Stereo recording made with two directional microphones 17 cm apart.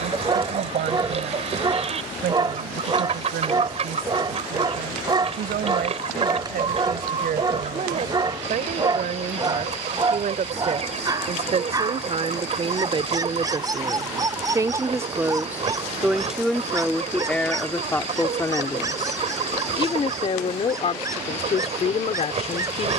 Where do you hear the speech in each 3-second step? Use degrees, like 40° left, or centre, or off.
60° right, 60° right, 50° right, 40° right, 30° right, centre, 30° left, 40° left.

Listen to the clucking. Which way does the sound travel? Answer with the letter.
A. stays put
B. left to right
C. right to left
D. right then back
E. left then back
A.